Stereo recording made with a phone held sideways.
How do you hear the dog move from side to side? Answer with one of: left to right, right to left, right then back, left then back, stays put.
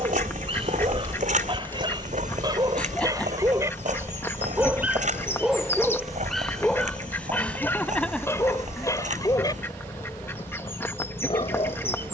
right to left.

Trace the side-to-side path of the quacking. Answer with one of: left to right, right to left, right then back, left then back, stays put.
stays put.